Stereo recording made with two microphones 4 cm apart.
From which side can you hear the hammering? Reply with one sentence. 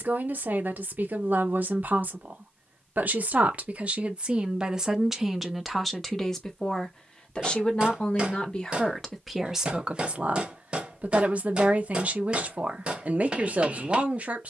In this clip you hear the hammering on the right.